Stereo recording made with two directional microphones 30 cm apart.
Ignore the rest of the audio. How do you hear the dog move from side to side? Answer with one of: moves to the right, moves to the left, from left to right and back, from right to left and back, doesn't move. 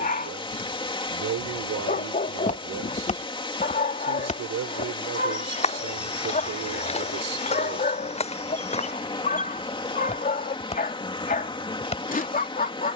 doesn't move.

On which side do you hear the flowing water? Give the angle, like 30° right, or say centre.
20° left.